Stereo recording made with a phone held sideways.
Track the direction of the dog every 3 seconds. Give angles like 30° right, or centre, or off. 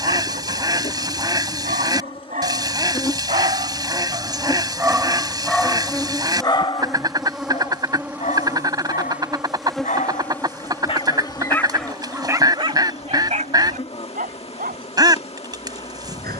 60° right, 20° right, 50° left, 40° left, 40° right, 70° right.